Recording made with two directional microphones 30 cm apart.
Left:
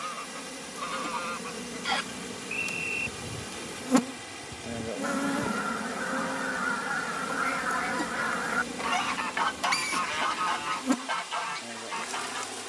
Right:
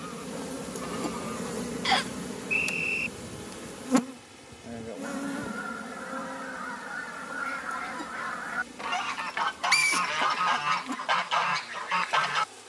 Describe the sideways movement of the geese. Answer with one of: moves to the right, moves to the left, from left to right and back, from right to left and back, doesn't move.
moves to the right.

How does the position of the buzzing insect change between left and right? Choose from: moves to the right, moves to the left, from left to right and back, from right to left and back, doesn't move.
moves to the left.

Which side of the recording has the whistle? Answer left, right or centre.
right.